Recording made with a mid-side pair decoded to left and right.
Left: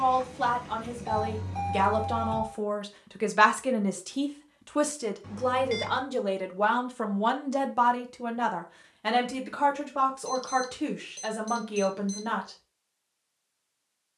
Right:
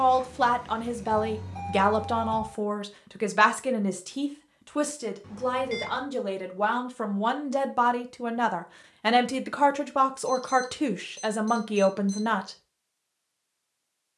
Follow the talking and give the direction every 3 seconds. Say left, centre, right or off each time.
right, centre, centre, right, right.